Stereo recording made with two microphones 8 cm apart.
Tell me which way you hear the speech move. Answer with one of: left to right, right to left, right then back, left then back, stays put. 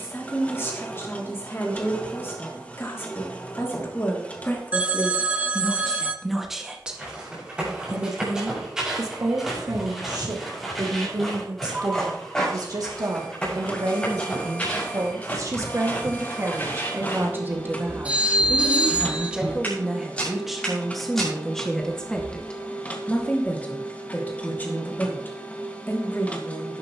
right then back.